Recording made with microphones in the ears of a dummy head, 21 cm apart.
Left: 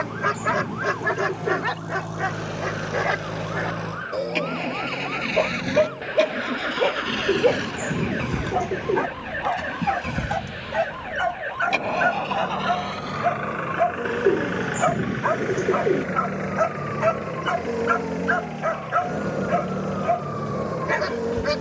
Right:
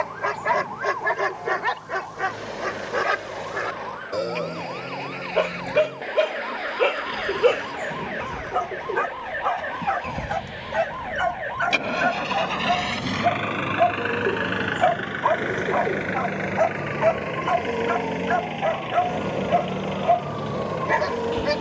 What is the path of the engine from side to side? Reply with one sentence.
You can hear the engine go from the left side to the right.